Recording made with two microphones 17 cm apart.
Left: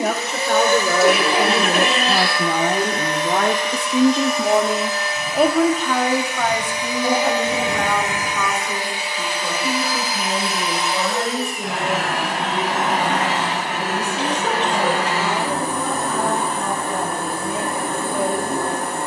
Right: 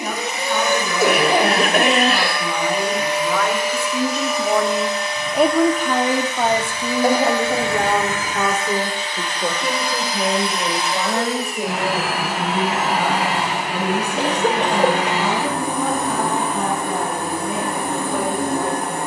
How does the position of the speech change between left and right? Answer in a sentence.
You can hear the speech travel towards the right.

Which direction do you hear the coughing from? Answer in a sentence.
You can hear the coughing on the right.